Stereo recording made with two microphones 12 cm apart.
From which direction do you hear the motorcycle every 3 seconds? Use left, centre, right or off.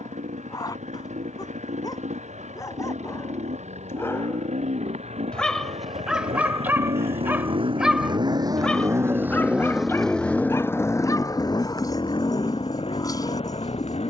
right, right, right, centre, left.